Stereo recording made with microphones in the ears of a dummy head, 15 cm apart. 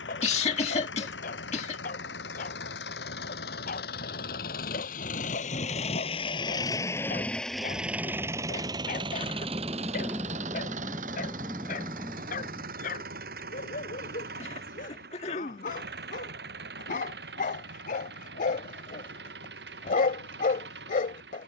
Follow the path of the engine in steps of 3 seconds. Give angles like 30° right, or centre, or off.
80° left, 60° left, centre, 40° right, 60° right, 70° right, 70° right.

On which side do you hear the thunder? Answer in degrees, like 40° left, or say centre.
10° right.